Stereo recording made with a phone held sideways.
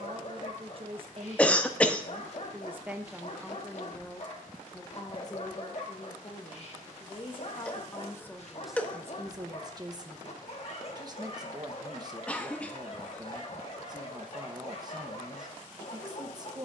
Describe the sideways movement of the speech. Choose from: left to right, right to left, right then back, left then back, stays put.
left then back.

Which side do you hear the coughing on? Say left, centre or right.
centre.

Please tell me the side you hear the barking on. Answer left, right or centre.
left.